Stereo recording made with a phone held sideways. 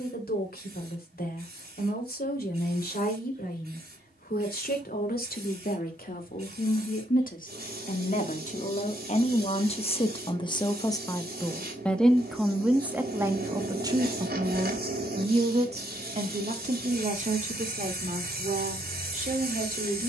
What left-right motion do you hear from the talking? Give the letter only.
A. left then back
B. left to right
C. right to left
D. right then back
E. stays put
B.